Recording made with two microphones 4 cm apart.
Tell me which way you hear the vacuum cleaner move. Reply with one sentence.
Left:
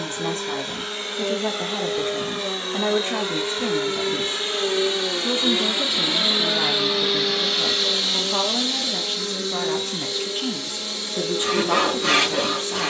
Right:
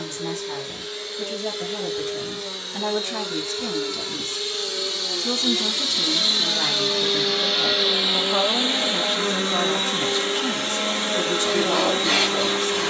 You can hear the vacuum cleaner move from left to right.